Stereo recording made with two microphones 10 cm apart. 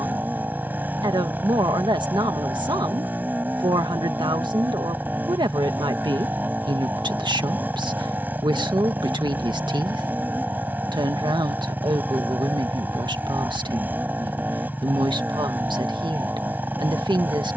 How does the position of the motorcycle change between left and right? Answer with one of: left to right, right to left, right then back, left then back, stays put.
stays put.